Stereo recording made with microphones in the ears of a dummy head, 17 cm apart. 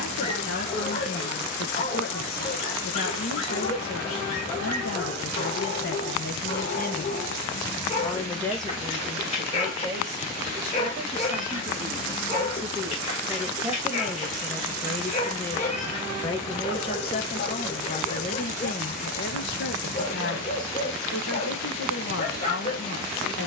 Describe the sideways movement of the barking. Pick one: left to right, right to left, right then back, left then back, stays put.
stays put.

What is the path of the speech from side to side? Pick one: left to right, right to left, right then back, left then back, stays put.
right then back.